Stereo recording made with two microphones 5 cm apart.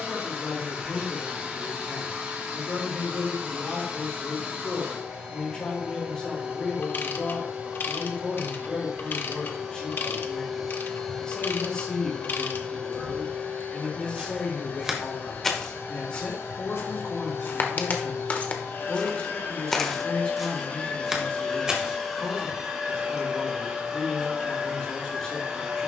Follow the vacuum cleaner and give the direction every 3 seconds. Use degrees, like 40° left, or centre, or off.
30° right, 30° right, 30° right, centre, 30° left, 60° left, 50° left, centre, 20° right.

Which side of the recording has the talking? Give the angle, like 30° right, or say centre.
20° left.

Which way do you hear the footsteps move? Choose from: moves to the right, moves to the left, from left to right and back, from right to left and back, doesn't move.
from right to left and back.